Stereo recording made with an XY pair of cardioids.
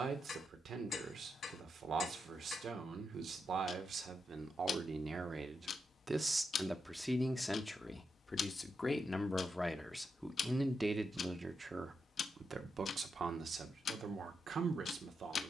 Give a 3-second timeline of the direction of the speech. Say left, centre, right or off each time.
right, right, centre, centre, right.